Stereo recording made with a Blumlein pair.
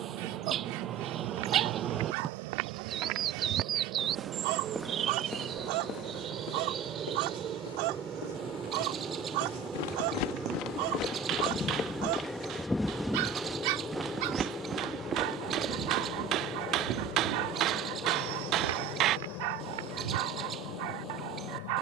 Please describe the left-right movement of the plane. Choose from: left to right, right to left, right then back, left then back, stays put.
right to left.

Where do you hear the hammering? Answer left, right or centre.
right.